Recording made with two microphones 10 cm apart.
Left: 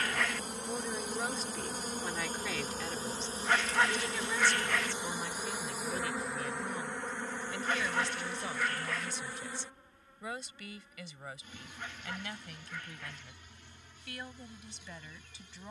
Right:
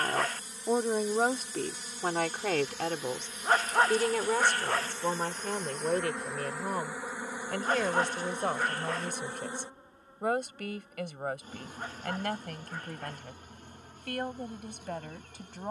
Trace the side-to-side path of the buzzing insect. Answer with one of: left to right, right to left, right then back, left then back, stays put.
left to right.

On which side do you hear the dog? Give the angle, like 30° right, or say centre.
40° right.